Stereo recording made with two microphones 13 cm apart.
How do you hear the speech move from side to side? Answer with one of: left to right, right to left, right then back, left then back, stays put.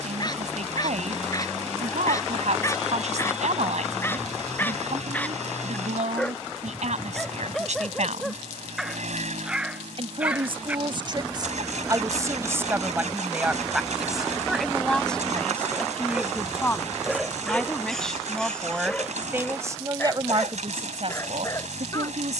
left then back.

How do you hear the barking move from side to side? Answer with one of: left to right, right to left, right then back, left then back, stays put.
right then back.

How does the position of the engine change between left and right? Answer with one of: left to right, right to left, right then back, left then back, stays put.
stays put.